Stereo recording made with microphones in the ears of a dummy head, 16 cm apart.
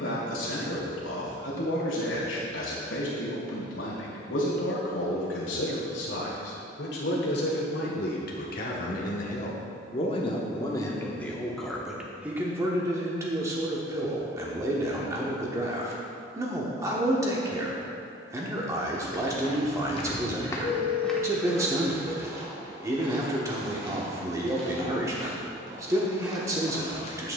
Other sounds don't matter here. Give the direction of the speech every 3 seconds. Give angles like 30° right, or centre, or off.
80° left, 80° left, 60° left, 20° left, 20° right, 20° right, 20° right, 20° right, 20° right.